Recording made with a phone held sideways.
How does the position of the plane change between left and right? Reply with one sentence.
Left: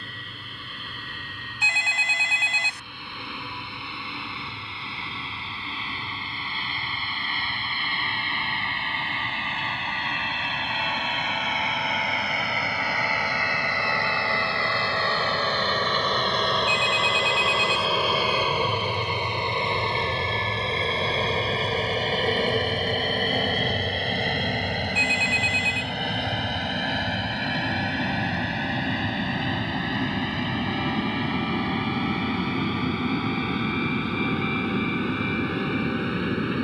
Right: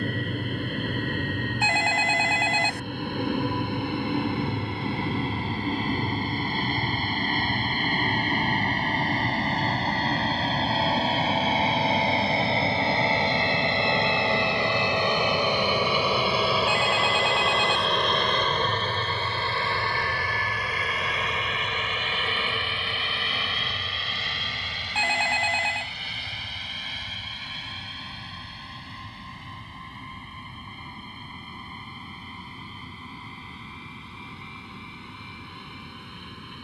You can hear the plane travel towards the left.